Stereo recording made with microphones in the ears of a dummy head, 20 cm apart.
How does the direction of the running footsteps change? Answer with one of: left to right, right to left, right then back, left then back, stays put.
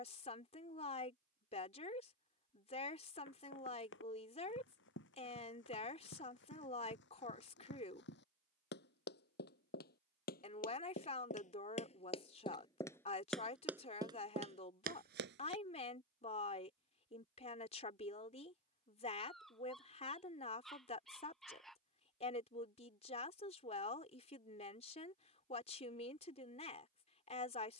left to right.